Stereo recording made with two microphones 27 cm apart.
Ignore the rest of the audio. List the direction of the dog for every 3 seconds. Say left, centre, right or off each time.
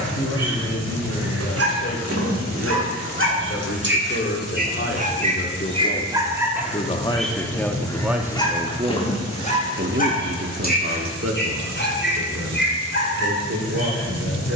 right, right, centre, left, left.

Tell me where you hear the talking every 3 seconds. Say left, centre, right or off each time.
left, left, centre, right, right.